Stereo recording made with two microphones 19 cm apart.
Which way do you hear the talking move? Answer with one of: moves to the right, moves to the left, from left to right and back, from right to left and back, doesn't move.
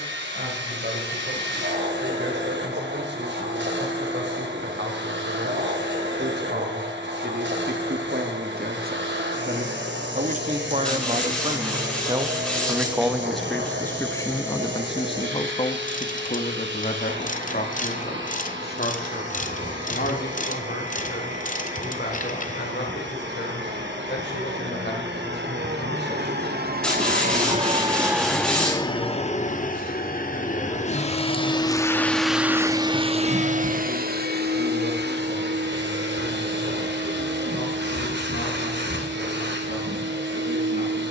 moves to the left.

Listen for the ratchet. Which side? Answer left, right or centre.
left.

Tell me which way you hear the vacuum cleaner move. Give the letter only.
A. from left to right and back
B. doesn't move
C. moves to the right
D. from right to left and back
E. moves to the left
D.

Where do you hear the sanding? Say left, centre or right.
centre.